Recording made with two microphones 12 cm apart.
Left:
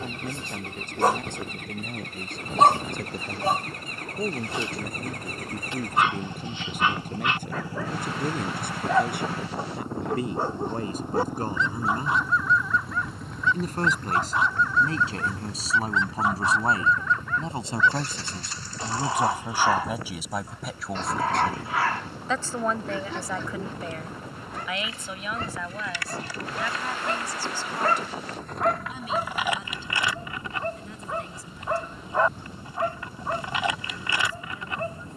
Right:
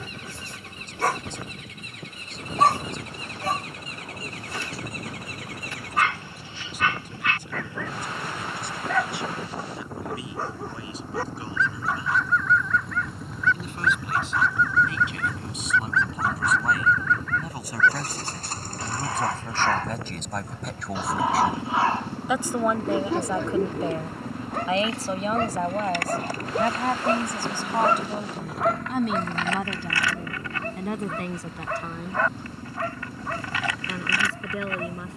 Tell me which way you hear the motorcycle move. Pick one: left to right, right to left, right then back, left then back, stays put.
left to right.